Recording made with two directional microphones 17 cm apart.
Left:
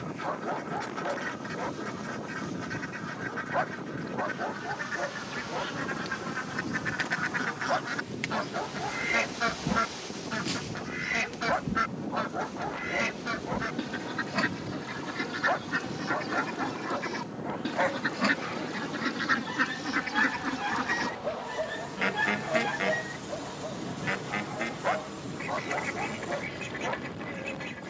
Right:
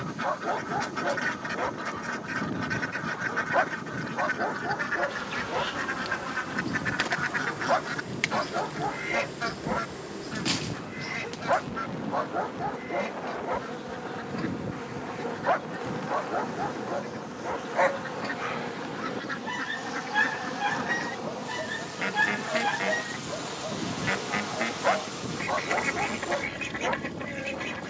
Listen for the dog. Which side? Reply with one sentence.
You can hear the dog on the right.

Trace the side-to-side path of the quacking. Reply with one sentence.
In this clip you hear the quacking move from right to left and back again.